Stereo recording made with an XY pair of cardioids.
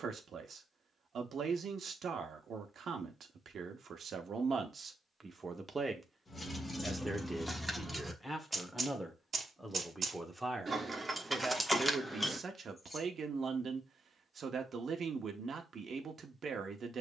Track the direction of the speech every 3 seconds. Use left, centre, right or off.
right, right, centre, centre, right, right.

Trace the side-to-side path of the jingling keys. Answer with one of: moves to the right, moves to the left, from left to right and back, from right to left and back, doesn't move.
from left to right and back.